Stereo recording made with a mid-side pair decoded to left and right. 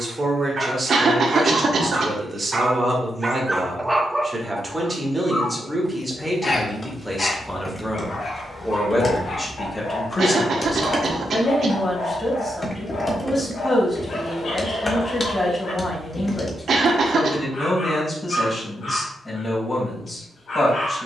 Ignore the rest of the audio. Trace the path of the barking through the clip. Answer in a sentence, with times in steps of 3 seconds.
You can hear the barking on the right from 0 s, in the centre from 3 s and on the left from 6 s.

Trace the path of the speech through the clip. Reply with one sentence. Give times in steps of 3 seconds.
You can hear the speech on the right from 0 s, in the centre from 6 s and on the left from 9 s.